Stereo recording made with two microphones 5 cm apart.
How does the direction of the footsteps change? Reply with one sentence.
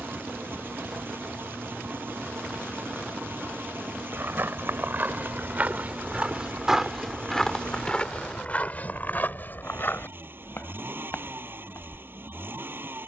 You can hear the footsteps go from the right side to the left.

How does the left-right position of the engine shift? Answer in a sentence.
You can hear the engine stay in one place.